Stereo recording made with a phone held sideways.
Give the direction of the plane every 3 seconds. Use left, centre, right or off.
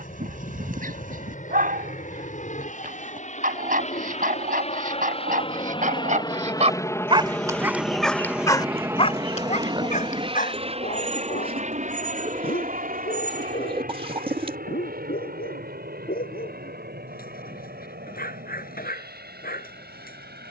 left, left, centre, right, right, right, right.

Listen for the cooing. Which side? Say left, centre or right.
right.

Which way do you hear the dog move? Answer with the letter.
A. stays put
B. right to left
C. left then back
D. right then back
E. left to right
B.